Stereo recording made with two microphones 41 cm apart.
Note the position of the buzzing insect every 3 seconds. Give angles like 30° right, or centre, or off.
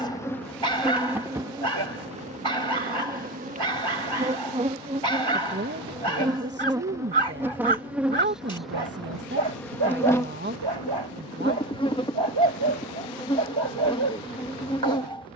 10° right, 20° right, 10° right, 10° left, 10° left.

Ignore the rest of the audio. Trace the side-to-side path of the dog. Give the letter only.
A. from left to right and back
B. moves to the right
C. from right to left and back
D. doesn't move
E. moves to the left
D.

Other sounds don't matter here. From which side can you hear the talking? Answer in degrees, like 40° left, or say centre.
30° right.